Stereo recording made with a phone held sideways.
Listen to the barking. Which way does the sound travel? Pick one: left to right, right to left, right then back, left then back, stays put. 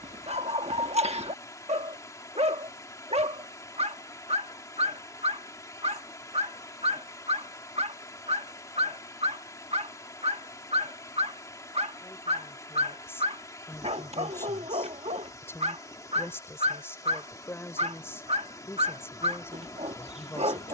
stays put.